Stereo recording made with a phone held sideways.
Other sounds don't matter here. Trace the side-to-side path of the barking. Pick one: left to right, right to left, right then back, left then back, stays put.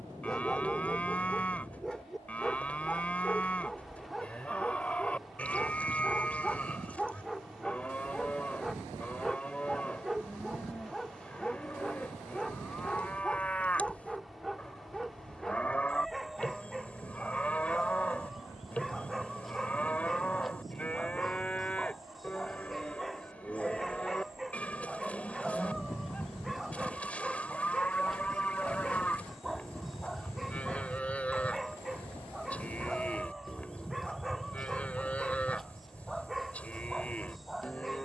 stays put.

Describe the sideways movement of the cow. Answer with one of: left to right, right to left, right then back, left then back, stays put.
stays put.